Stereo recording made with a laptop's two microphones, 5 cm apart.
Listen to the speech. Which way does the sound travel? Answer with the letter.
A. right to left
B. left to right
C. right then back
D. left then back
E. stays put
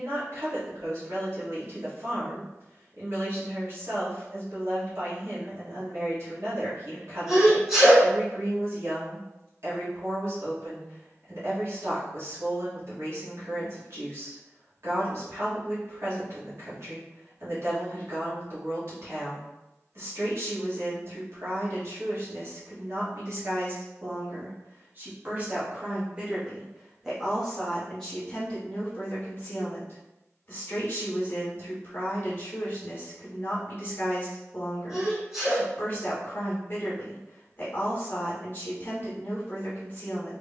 A.